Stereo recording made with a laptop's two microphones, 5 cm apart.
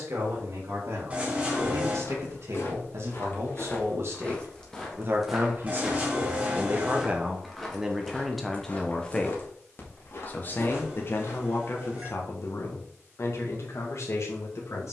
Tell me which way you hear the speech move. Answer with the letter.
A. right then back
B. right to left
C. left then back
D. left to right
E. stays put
B.